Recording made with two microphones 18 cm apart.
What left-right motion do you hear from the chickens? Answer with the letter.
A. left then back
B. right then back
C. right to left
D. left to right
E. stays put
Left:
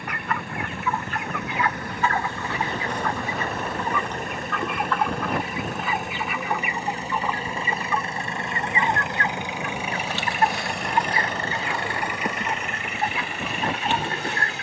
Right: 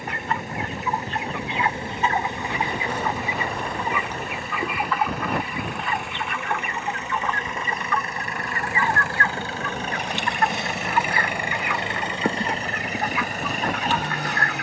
C.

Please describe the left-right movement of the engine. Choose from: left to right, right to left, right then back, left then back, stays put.
left to right.